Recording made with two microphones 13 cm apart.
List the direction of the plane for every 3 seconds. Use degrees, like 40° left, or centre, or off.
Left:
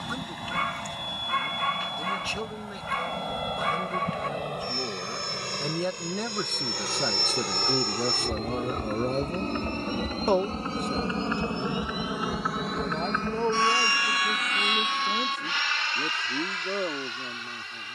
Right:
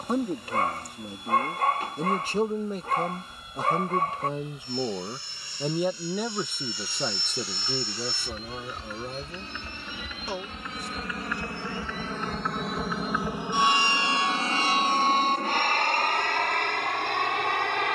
80° left, 70° left, 60° left, 40° left, 10° right, 50° right.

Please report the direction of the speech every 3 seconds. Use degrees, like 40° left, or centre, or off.
40° right, 20° right, 10° left, 50° left, 70° left, 80° left.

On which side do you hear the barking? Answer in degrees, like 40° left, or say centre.
40° right.